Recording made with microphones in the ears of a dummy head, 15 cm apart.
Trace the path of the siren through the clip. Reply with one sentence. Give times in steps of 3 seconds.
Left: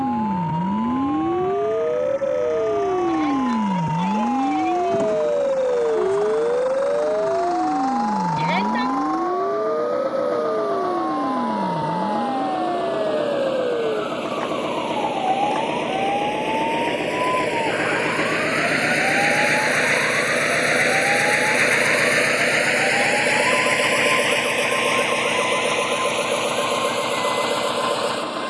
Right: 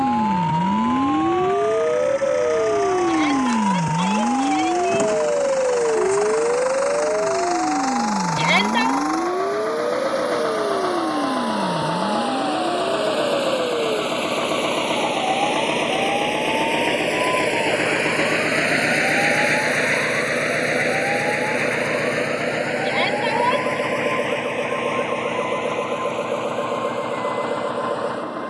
You can hear the siren on the right from 0 s, in the centre from 3 s and on the left from 6 s.